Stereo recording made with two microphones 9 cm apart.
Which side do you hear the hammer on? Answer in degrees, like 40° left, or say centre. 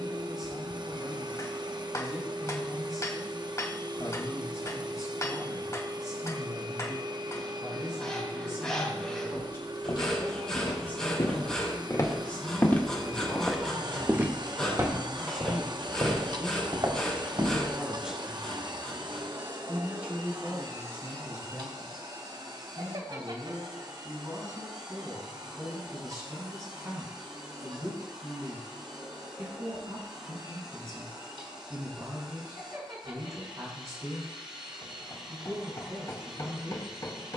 40° left.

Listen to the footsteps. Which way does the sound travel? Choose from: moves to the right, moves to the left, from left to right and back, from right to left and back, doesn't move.
moves to the right.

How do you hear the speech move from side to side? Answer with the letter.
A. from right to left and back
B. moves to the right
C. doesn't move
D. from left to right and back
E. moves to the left
B.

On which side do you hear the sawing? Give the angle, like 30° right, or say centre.
10° left.